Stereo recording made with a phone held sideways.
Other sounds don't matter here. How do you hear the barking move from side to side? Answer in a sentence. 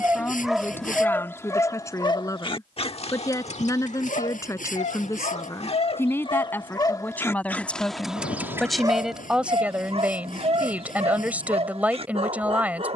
In this clip you hear the barking move from right to left and back again.